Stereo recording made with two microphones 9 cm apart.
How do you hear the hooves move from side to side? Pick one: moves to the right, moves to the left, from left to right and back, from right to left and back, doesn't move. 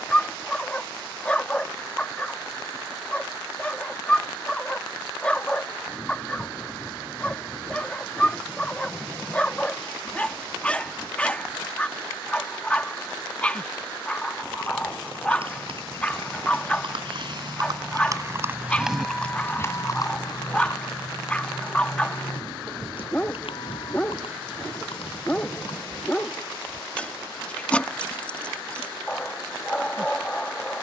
moves to the left.